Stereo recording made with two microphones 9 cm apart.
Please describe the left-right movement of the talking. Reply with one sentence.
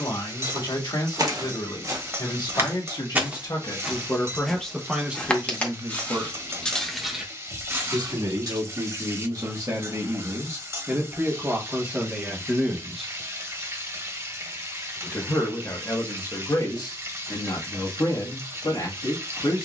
You can hear the talking go right and come back.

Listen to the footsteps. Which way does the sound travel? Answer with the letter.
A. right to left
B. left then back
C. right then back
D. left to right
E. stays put
B.